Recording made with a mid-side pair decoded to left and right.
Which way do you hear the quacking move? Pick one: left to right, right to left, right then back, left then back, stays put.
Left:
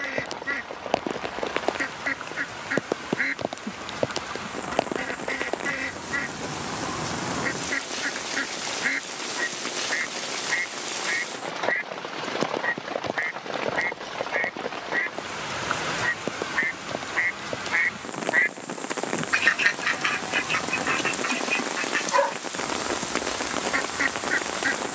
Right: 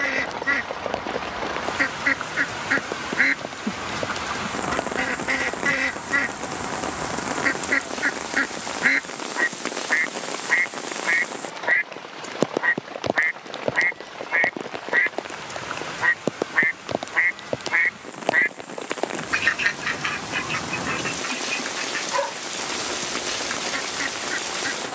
right to left.